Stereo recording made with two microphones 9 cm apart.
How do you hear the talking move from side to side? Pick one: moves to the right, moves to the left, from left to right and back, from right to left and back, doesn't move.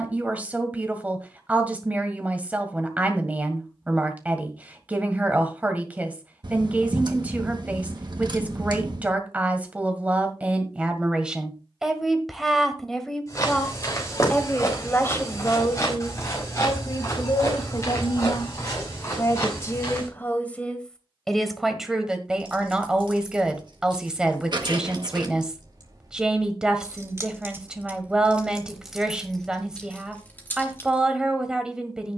from right to left and back.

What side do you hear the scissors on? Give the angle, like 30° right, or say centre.
50° right.